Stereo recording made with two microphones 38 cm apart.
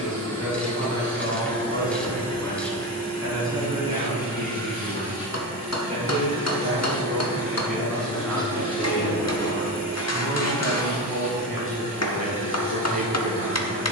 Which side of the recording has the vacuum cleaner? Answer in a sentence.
You can hear the vacuum cleaner in the centre.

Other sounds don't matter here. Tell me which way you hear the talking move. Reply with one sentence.
You can hear the talking go right and come back.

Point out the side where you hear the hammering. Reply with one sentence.
In this clip you hear the hammering on the left.